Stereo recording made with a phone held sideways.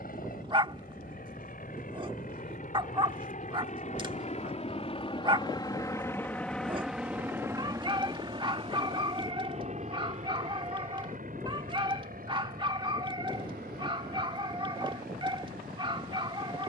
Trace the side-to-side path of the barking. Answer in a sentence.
You can hear the barking stay in one place.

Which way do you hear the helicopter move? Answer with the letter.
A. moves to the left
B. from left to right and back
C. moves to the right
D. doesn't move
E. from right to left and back
C.